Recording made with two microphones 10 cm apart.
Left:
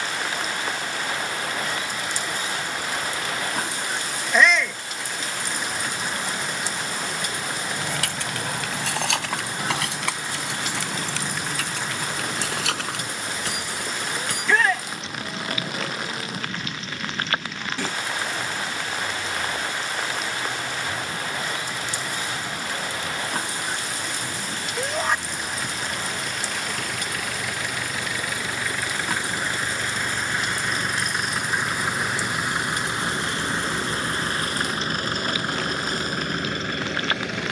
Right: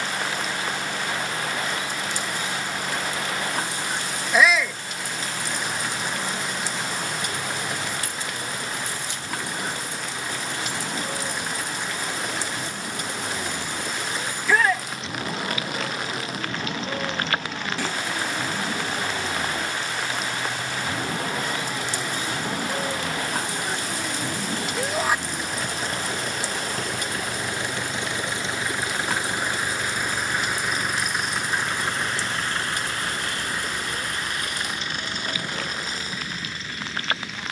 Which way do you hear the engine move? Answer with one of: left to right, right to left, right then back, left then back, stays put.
right to left.